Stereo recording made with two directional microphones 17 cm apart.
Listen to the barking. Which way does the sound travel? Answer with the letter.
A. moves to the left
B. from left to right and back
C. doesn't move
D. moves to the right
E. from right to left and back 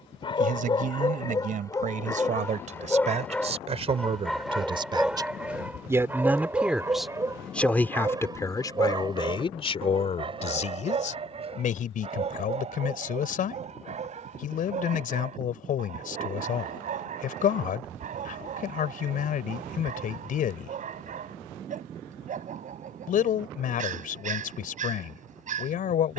D.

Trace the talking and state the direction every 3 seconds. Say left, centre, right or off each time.
right, right, centre, left, left, left, left, left, left.